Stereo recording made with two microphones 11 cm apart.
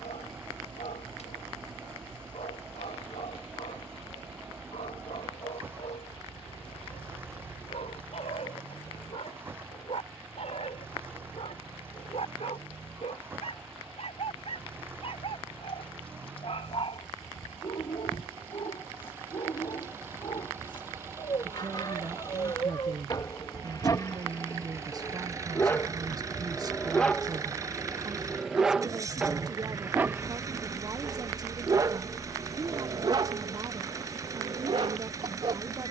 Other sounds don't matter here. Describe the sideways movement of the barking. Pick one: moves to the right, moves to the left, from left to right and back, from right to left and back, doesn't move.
moves to the right.